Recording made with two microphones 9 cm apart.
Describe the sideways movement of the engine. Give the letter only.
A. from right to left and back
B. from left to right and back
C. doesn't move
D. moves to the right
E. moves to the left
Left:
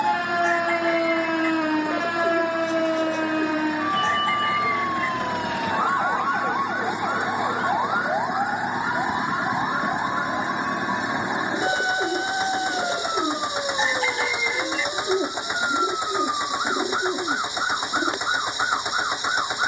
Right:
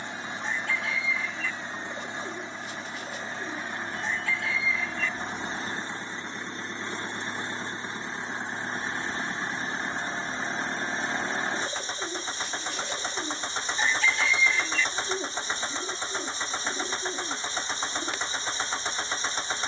C.